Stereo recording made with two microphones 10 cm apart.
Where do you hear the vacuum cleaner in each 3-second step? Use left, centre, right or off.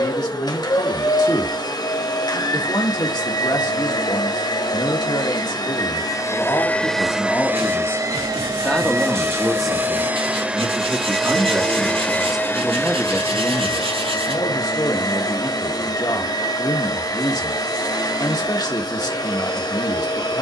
left, left, centre, centre, left, left, left.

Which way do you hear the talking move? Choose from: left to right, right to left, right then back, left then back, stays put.
right then back.